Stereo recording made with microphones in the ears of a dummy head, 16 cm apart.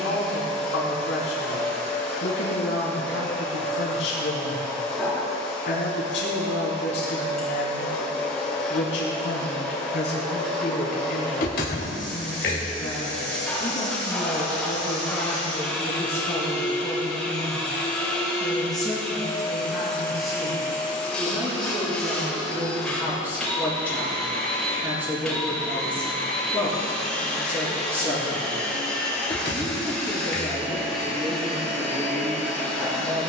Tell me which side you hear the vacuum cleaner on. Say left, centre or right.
centre.